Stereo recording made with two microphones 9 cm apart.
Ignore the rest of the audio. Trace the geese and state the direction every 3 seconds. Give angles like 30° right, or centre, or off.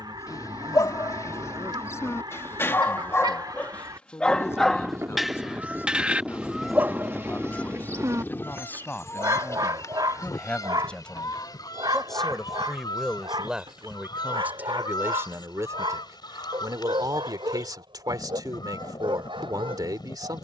60° right, 40° right, 10° left, 40° left, 50° left, 50° left, 50° left.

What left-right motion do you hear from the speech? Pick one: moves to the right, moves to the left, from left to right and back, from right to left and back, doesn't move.
moves to the right.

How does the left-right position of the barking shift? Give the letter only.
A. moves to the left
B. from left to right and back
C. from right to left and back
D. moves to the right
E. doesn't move
D.